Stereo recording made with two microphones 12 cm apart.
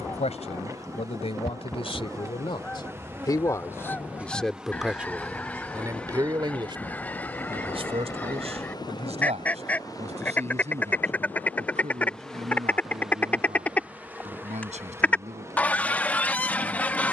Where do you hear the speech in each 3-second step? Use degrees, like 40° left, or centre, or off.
60° left, centre, 50° right, 70° right, 70° right, 70° right.